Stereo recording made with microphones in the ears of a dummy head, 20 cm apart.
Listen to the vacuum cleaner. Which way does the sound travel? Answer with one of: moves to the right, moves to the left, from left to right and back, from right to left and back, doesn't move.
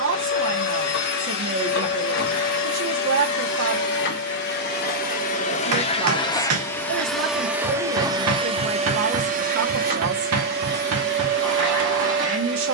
moves to the right.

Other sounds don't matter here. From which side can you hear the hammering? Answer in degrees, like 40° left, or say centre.
70° right.